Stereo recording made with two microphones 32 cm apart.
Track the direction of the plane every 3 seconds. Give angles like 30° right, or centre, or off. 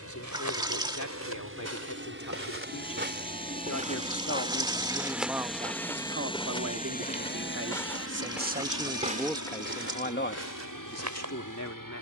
40° right, 10° right, 30° left, 60° left.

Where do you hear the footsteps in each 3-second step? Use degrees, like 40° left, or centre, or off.
50° right, 10° right, 10° left, 50° right.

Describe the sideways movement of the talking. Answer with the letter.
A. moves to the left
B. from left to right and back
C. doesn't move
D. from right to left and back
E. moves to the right
B.